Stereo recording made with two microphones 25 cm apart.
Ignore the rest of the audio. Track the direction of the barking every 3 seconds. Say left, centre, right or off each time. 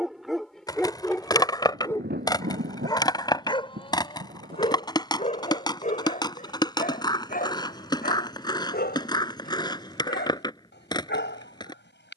centre, left, left, left.